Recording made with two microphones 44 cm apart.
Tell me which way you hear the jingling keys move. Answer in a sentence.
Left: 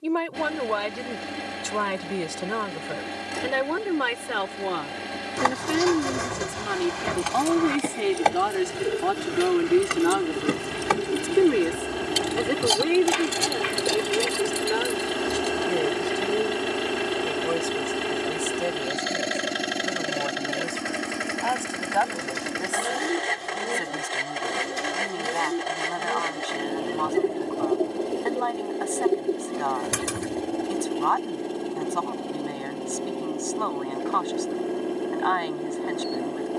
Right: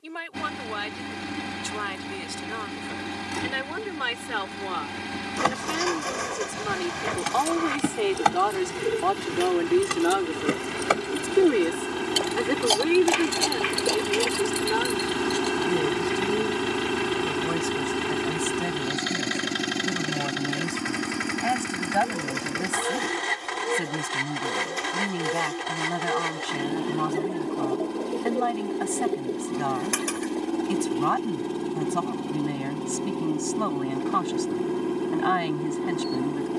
In this clip you hear the jingling keys move to the left.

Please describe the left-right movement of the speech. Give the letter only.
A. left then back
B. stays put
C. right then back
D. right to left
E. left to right
E.